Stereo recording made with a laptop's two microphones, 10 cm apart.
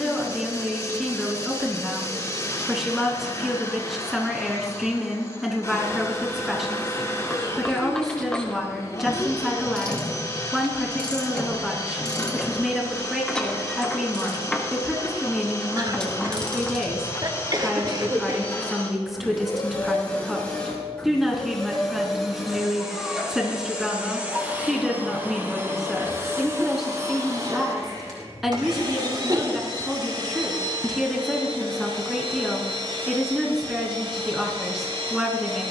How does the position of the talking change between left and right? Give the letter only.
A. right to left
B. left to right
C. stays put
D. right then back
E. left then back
C.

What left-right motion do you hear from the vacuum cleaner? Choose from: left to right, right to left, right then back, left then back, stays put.
left to right.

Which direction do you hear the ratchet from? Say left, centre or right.
centre.